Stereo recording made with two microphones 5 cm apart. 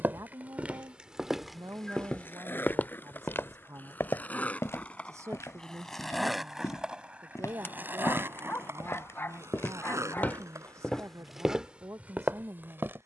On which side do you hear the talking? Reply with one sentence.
You can hear the talking on the right.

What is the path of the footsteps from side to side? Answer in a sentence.
You can hear the footsteps go left and come back.